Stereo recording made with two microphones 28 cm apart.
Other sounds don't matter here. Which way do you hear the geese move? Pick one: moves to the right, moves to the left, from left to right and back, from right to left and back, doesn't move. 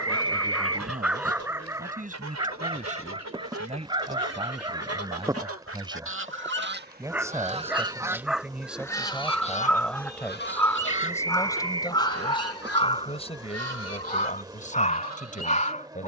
moves to the left.